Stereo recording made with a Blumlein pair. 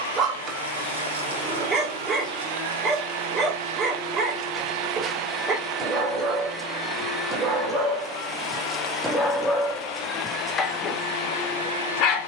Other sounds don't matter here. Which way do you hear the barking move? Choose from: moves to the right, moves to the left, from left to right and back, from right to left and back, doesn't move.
moves to the left.